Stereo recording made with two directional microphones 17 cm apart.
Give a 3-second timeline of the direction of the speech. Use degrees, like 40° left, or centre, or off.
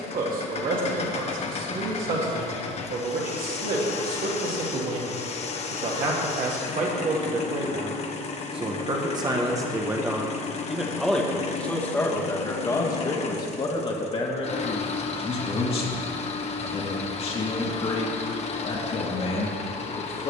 60° right, 60° right, 40° right, 10° right, 30° left, 40° left, 40° left.